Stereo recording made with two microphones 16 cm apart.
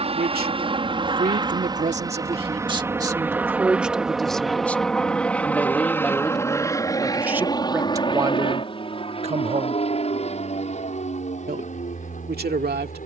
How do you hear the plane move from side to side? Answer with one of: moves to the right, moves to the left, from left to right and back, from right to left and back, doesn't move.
moves to the left.